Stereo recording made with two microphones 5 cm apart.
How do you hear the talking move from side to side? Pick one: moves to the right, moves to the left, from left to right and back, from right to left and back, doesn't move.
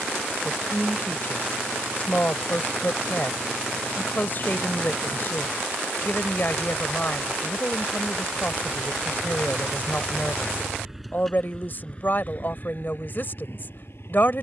doesn't move.